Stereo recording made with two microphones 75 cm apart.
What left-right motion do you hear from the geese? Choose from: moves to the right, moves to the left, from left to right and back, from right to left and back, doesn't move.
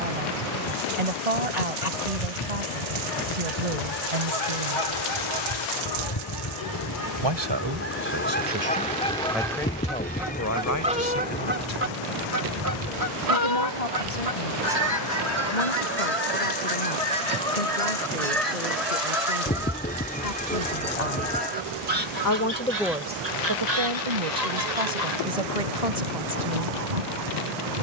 moves to the right.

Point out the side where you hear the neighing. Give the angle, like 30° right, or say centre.
10° left.